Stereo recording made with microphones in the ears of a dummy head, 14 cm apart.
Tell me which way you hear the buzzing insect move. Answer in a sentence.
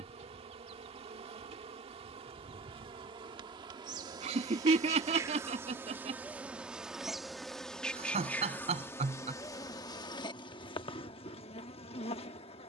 In this clip you hear the buzzing insect move to the left.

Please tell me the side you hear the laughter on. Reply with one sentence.
You can hear the laughter on the right.